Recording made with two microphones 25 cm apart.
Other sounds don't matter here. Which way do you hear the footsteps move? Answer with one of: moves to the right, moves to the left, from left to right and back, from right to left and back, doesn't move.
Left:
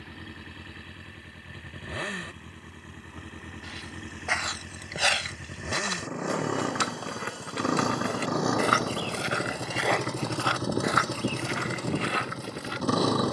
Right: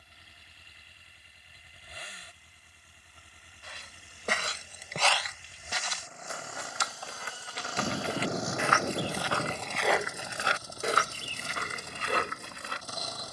from right to left and back.